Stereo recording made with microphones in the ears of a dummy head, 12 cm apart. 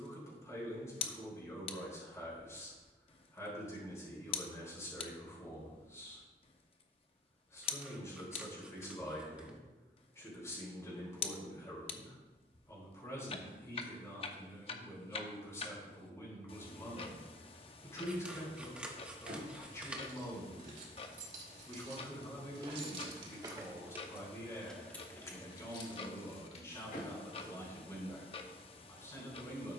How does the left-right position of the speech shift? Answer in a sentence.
You can hear the speech stay in one place.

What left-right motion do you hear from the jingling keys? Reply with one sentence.
In this clip you hear the jingling keys go from the right side to the left.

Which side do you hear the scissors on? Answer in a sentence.
In this clip you hear the scissors in the centre.